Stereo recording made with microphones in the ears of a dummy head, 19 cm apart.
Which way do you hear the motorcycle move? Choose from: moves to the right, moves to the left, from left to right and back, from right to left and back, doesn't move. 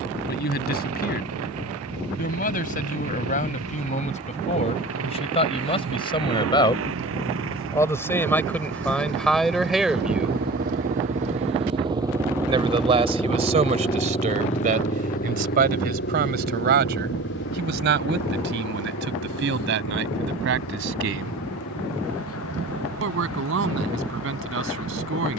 moves to the left.